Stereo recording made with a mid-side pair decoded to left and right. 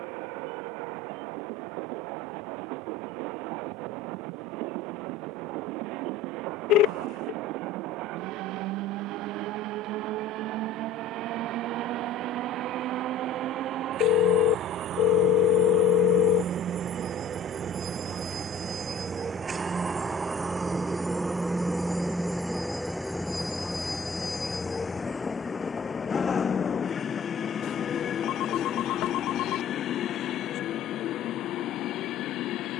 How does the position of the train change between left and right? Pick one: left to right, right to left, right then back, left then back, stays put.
right to left.